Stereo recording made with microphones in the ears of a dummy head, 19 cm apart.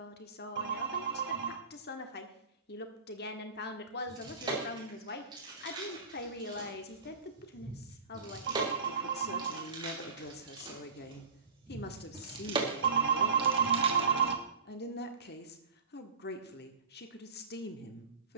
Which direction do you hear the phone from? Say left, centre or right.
right.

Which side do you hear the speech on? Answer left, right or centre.
left.